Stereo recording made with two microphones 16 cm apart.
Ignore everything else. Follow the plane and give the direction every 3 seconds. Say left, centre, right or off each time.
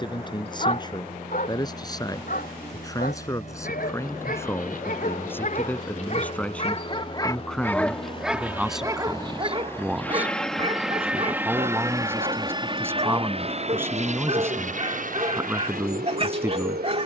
left, left, left, centre, right, right.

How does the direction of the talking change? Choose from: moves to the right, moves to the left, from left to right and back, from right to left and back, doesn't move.
moves to the right.